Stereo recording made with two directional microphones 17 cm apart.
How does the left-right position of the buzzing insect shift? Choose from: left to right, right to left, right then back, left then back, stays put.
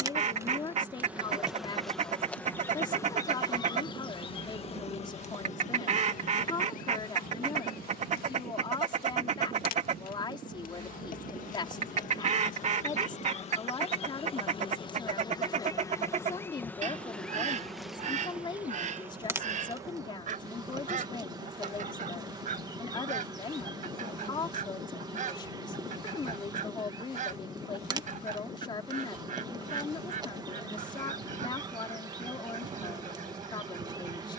left then back.